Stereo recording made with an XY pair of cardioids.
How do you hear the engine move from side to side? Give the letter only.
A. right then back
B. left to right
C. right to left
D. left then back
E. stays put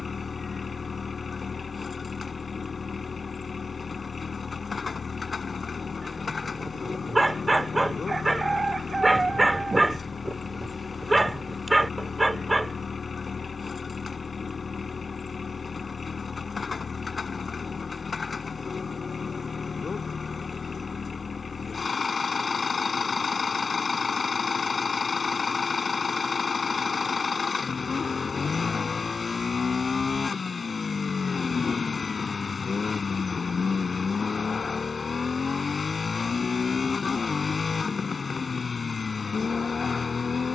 E.